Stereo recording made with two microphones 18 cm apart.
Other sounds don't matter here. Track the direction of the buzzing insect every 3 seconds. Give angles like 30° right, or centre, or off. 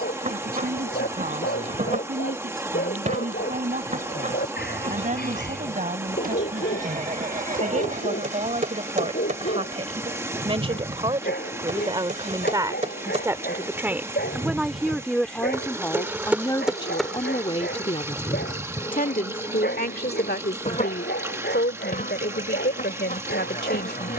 40° right, 40° right, 40° right, 40° right, 30° right, centre, 30° left, 50° left.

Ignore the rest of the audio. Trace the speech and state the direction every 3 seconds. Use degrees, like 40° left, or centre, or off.
50° right, 50° right, 40° right, 30° right, 10° right, 20° left, 60° left, 70° left.